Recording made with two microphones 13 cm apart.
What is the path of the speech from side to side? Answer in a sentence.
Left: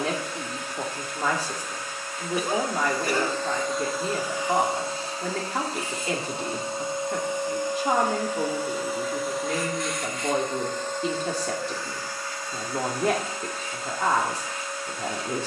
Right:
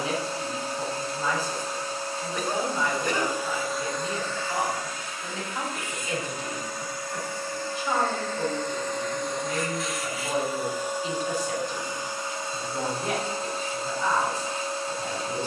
In this clip you hear the speech stay in one place.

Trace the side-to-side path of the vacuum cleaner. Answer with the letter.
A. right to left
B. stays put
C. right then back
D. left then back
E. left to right
D.